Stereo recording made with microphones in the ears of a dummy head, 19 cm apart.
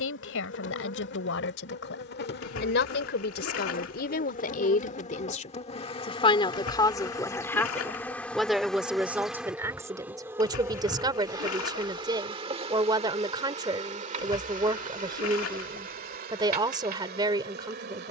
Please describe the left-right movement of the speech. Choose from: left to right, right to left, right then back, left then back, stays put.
left to right.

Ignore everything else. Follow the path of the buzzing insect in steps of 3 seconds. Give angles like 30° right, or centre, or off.
50° left, 40° left, 10° left, 10° right, 30° right, 40° right.